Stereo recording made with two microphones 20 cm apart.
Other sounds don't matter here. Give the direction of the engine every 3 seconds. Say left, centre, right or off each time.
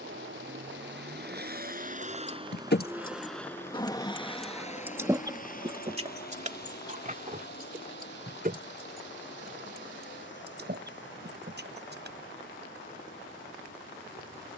right, left, left, left, left.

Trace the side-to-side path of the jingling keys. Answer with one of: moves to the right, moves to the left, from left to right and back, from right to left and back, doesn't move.
moves to the right.